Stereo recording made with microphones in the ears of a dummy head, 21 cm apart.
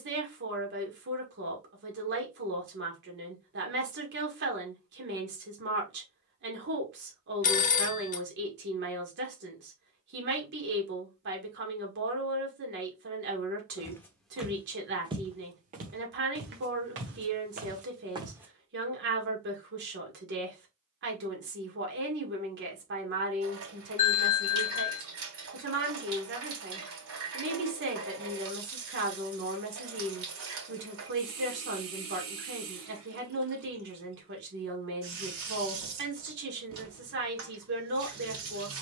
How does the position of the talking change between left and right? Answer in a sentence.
In this clip you hear the talking stay in one place.